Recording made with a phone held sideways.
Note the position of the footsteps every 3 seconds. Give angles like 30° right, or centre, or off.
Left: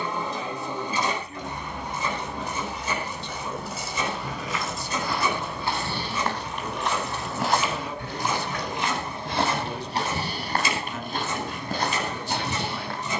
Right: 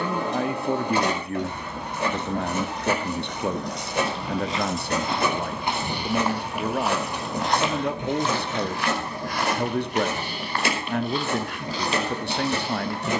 off, 20° right, centre, 40° left, 60° left.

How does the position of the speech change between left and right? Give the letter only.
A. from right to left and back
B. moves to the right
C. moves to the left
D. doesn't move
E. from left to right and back
D.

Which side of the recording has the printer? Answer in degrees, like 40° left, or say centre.
60° right.